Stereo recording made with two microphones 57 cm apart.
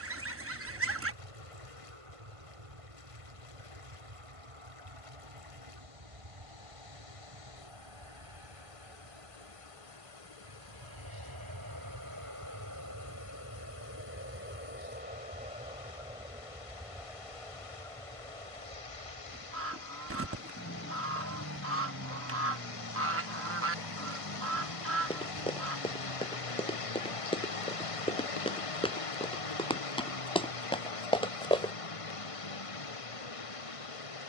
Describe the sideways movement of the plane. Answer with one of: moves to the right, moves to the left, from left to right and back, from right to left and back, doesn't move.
moves to the left.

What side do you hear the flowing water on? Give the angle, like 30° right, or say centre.
70° left.